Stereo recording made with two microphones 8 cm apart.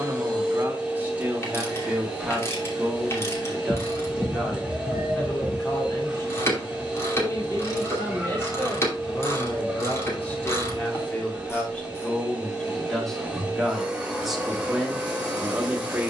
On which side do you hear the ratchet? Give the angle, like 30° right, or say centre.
30° left.